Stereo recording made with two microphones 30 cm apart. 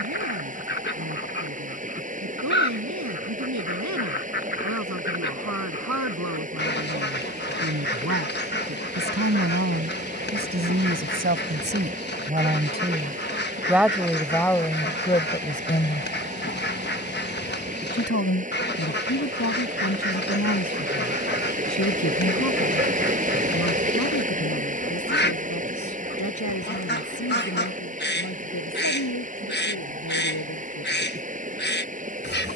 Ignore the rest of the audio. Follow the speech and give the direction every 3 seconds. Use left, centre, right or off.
right, right, right, right, centre, left, left, left, left, left, left.